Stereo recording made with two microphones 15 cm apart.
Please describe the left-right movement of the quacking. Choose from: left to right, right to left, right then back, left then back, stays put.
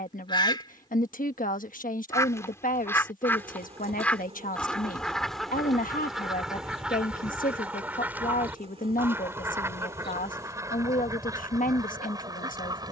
left to right.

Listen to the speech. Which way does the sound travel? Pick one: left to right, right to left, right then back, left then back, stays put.
stays put.